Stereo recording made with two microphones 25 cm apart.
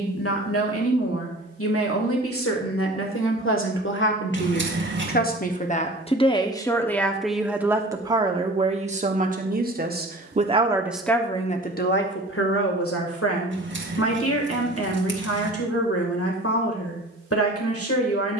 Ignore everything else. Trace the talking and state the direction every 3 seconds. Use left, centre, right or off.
left, left, centre, centre, left, left.